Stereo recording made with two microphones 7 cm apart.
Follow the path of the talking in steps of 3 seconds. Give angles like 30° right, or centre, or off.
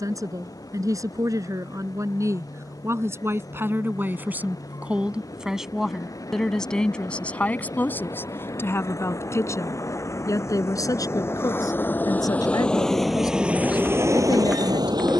50° right, 20° right, 20° left, 50° left, 60° left.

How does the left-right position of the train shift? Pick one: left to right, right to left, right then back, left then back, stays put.
left to right.